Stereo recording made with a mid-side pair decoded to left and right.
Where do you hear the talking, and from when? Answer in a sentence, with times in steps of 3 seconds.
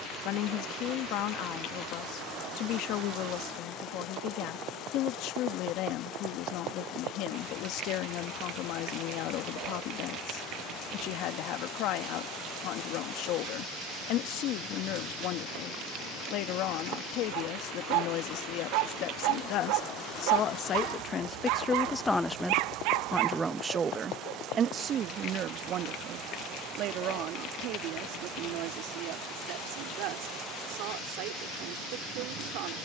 In this clip you hear the talking on the left from 0 s, in the centre from 21 s and on the right from 24 s.